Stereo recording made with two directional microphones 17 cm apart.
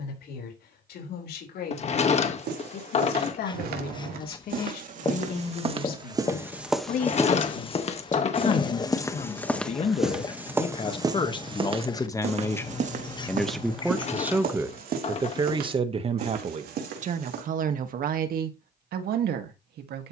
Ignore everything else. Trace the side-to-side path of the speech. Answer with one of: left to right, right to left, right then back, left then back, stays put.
left to right.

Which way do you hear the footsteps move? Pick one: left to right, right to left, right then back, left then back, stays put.
left then back.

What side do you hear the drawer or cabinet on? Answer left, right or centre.
left.